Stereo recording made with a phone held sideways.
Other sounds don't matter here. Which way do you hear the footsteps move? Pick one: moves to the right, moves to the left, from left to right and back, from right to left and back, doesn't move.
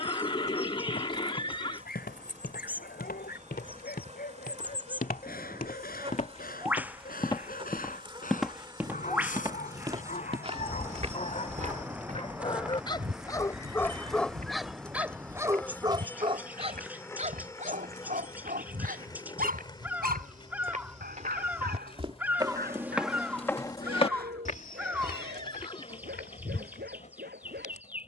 from left to right and back.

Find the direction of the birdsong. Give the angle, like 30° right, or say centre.
10° right.